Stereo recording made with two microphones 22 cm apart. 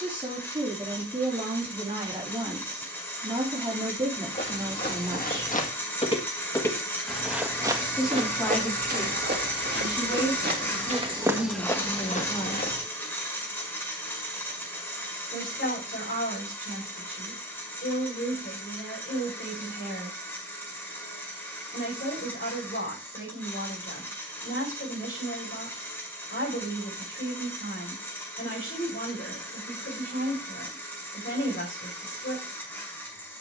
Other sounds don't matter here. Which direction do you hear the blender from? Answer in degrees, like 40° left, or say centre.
10° left.